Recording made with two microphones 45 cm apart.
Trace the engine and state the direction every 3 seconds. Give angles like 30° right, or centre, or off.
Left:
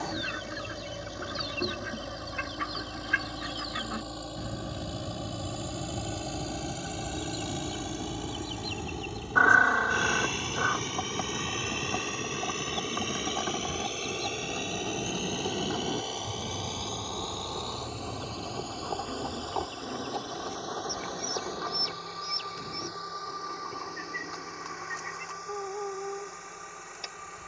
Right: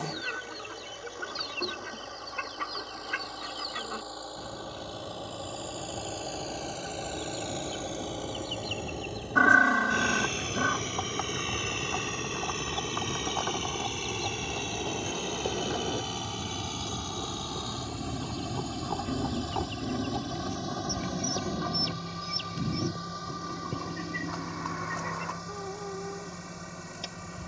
50° left, 40° left, 30° left, 10° left, 10° right, 30° right, 40° right, 50° right, 50° right.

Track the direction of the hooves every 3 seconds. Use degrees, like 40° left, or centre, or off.
off, off, off, 50° left, 40° left, 10° left, 20° right, 50° right, 70° right.